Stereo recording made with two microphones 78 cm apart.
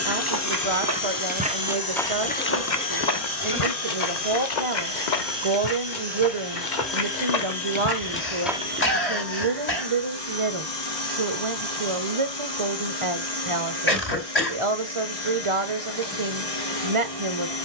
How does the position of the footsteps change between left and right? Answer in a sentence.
In this clip you hear the footsteps go left and come back.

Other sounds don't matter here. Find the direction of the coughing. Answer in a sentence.
You can hear the coughing on the left.